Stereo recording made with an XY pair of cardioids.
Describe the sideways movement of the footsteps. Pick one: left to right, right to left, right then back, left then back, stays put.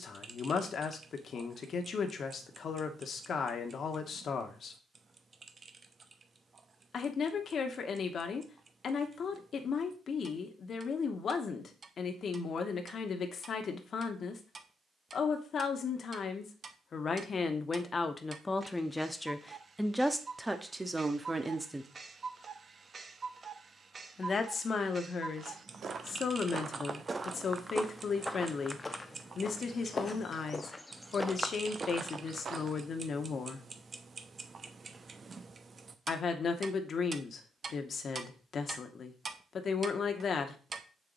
left then back.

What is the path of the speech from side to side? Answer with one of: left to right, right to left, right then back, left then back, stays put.
right then back.